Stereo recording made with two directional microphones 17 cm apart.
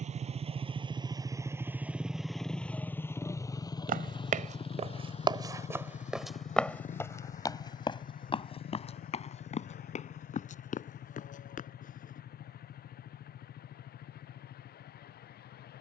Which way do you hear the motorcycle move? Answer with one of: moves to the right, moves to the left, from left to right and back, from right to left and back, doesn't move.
moves to the left.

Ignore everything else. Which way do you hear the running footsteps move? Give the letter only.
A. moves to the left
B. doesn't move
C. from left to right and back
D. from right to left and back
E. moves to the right
A.